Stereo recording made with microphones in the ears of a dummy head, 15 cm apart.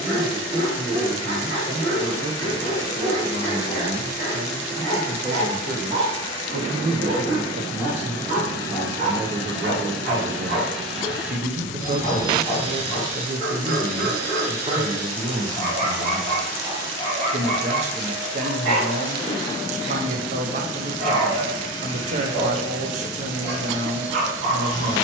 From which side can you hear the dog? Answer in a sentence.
You can hear the dog on the right.